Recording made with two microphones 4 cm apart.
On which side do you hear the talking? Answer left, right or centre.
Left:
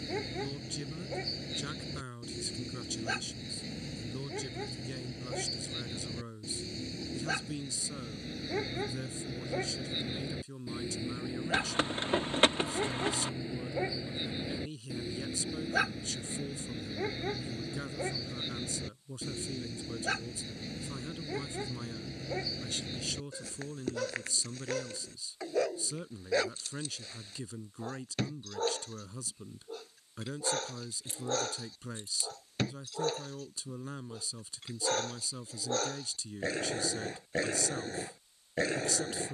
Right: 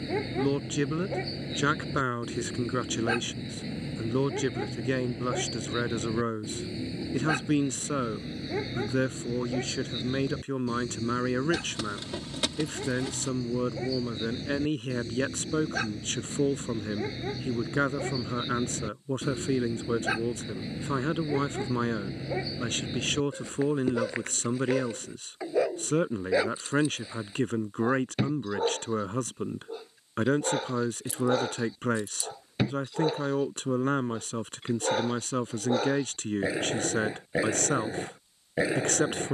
right.